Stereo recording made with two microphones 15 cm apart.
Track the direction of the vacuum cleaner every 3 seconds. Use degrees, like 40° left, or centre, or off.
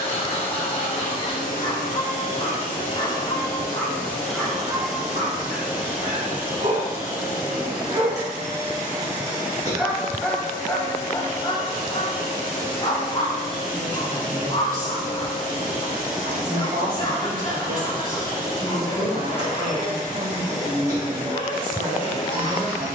60° left, 10° left, 20° right, 30° right, 30° right, 30° right, 30° right, 30° right.